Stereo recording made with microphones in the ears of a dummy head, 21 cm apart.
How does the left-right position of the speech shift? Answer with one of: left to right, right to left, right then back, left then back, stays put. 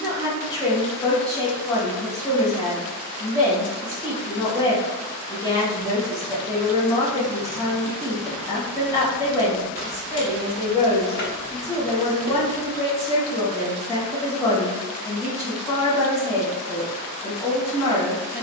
stays put.